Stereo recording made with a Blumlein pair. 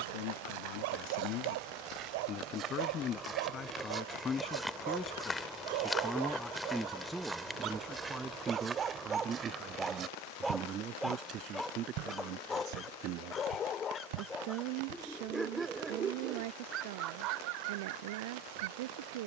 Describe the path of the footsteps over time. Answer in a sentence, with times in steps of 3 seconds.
You can hear the footsteps on the right from 0 s, in the centre from 3 s, on the right from 9 s and not at all from 15 s.